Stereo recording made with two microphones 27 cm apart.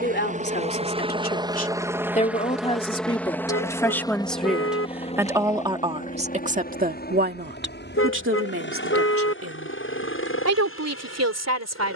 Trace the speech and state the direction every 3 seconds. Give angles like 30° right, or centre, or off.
30° left, centre, 40° right, 60° right.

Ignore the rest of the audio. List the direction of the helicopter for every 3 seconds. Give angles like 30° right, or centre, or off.
10° right, 20° left, 40° left, 50° left.